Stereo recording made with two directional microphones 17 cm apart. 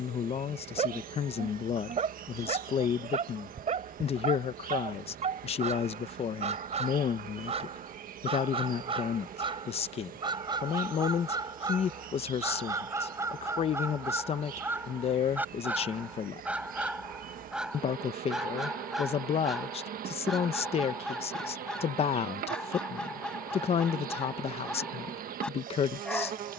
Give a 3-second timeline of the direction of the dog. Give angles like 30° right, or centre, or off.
40° right, 40° right, 40° right, 30° right, 20° right, 10° right, centre, centre, 10° left.